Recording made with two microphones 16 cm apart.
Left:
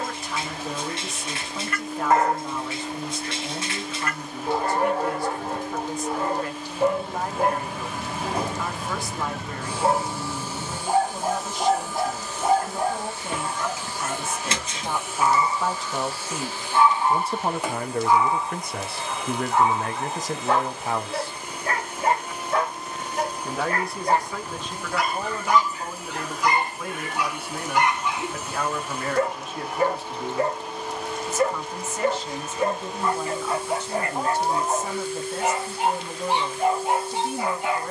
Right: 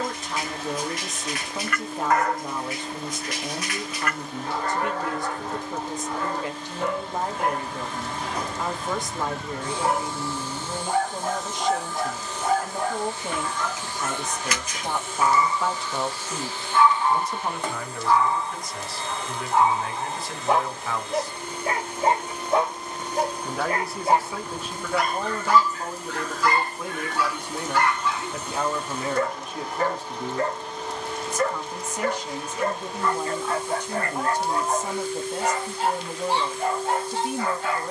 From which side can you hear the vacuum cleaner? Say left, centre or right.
centre.